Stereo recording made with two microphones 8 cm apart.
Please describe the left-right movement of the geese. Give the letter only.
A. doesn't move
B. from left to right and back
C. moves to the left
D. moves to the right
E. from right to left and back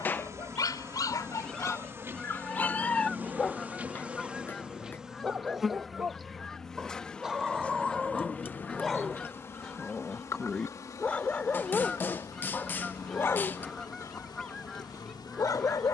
A.